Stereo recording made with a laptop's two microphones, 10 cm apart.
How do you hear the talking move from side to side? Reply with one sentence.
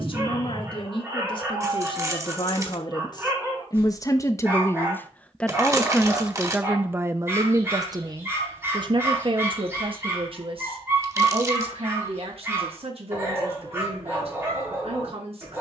You can hear the talking go from the left side to the right.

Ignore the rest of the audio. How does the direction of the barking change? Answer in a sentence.
In this clip you hear the barking stay in one place.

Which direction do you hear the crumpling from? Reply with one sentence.
You can hear the crumpling on the right.